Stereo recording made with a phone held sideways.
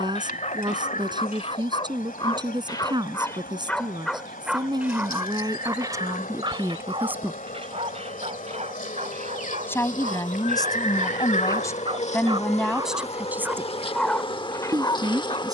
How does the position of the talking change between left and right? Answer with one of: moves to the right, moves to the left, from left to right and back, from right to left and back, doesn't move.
from right to left and back.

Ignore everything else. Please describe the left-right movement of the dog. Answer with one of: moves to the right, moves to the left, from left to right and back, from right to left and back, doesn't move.
from left to right and back.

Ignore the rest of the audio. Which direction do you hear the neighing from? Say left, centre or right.
left.